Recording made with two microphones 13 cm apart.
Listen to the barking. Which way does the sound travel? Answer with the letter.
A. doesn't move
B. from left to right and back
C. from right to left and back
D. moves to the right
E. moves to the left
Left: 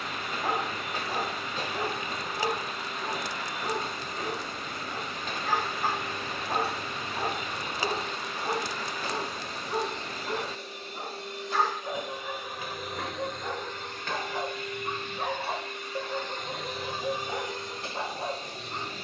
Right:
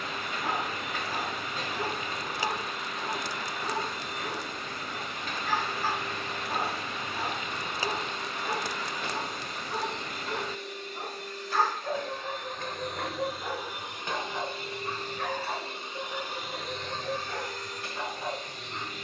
B.